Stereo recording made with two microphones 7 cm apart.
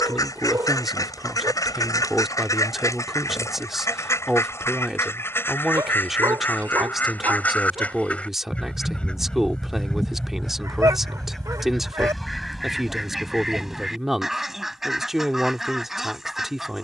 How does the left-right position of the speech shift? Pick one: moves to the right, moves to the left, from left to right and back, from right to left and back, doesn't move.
doesn't move.